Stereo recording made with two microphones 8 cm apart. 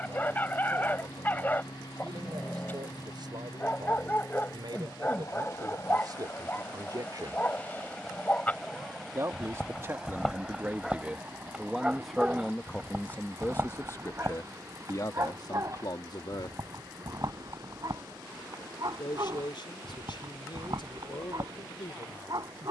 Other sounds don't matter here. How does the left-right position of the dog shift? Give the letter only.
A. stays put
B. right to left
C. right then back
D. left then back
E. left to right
E.